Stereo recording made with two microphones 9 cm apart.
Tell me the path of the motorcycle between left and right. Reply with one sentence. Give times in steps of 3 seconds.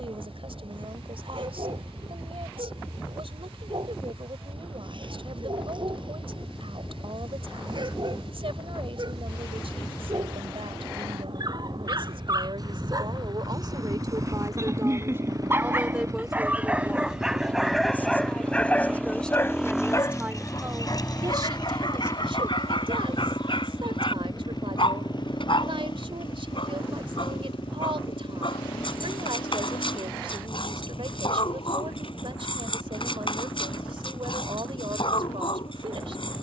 In this clip you hear the motorcycle on the right from 0 s, in the centre from 18 s and on the left from 21 s.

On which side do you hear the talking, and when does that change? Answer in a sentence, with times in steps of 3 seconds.
You can hear the talking on the right from 0 s, in the centre from 15 s and on the right from 21 s.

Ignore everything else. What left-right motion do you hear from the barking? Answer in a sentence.
You can hear the barking move to the left.